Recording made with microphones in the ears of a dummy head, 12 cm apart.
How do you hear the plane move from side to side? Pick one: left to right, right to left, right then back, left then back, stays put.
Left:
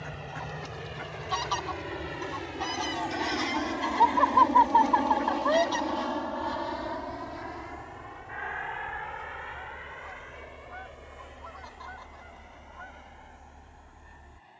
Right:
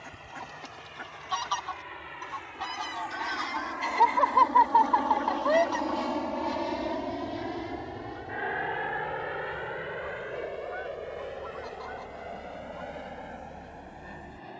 left to right.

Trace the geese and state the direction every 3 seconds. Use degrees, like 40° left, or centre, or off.
10° left, 30° left, 40° left, 20° left, 10° right.